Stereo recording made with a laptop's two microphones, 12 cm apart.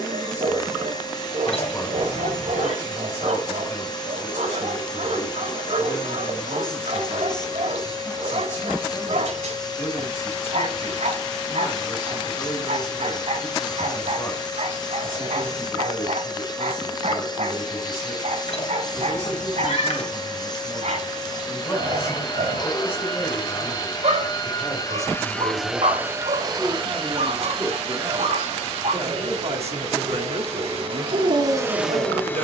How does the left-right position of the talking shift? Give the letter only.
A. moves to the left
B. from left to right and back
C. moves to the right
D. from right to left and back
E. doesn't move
C.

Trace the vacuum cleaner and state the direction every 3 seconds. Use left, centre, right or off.
left, left, left, left, left, left, left, left, centre, right, right.